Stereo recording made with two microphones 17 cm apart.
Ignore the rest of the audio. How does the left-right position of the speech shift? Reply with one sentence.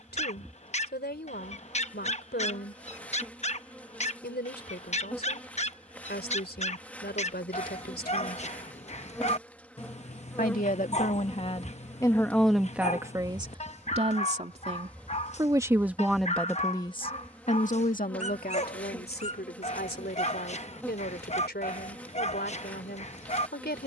You can hear the speech move from left to right and back again.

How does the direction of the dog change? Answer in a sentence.
In this clip you hear the dog stay in one place.